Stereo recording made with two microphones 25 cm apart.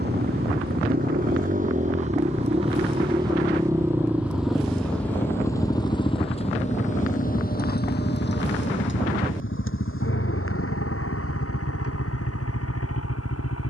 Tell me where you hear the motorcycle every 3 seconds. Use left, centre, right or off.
right, centre, left, left, left.